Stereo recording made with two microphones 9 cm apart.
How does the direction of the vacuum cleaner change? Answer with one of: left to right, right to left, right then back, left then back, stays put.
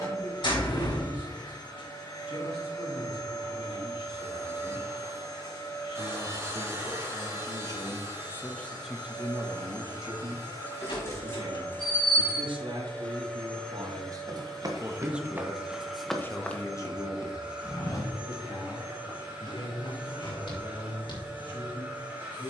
left to right.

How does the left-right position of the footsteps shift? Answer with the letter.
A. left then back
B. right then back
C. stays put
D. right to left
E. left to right
D.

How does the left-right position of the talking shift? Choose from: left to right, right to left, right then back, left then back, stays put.
right then back.